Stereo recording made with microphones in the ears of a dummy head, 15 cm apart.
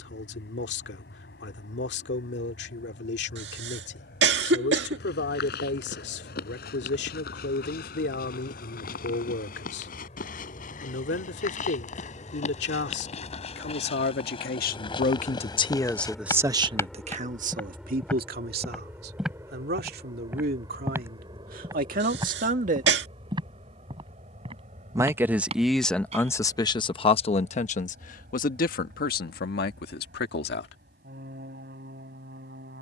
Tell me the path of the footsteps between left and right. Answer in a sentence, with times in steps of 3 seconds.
In this clip you hear the footsteps not at all from 0 s, on the left from 3 s, in the centre from 18 s, on the right from 21 s and not at all from 27 s.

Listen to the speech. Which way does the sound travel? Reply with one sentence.
You can hear the speech move from left to right and back again.